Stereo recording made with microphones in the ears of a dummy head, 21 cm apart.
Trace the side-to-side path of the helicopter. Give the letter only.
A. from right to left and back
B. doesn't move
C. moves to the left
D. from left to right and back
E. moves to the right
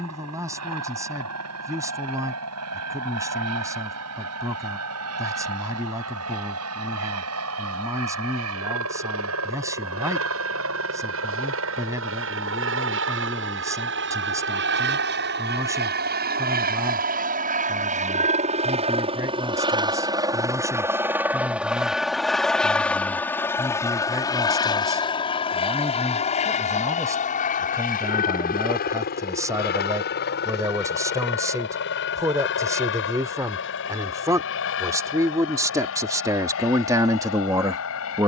C.